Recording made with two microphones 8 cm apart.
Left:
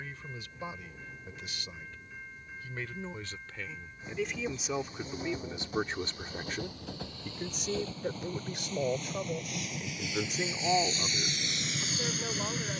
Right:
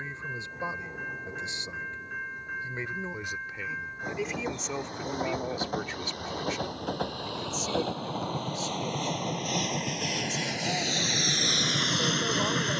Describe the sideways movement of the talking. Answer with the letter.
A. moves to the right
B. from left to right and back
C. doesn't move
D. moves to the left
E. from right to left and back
E.